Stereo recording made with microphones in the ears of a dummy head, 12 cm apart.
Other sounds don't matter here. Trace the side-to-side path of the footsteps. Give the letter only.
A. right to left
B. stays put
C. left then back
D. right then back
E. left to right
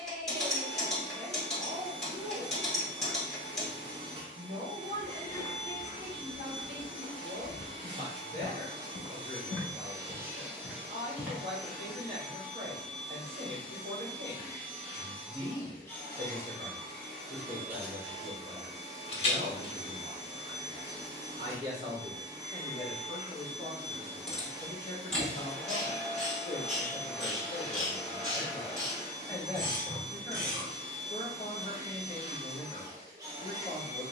C.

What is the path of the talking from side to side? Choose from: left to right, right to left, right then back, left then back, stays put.
right to left.